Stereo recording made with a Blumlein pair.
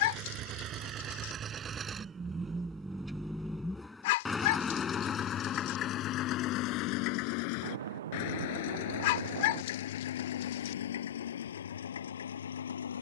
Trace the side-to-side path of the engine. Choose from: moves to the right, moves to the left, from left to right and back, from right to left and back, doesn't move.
moves to the left.